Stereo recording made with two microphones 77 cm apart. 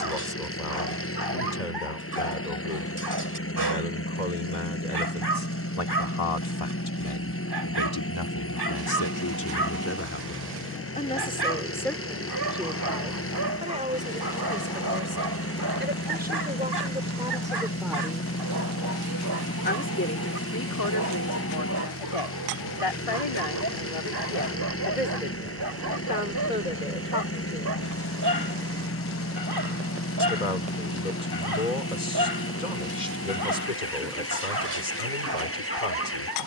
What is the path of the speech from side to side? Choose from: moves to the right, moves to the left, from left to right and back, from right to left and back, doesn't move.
from left to right and back.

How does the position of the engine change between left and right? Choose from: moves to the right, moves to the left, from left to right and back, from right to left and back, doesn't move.
doesn't move.